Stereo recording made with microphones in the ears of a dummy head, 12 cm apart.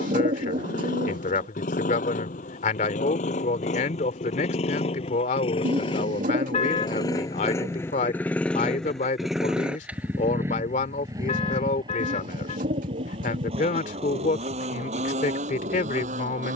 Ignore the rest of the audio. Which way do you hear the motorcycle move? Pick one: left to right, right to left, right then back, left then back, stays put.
left to right.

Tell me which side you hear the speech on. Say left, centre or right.
left.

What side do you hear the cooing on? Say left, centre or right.
right.